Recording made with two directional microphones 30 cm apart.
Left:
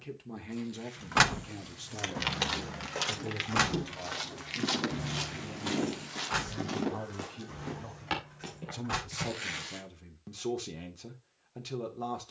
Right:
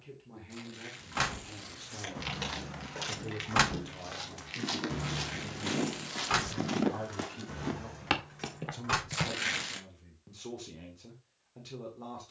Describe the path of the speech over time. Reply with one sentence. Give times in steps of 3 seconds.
In this clip you hear the speech on the left from 0 s, in the centre from 3 s and on the left from 9 s.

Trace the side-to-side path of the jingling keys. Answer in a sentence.
You can hear the jingling keys move from left to right.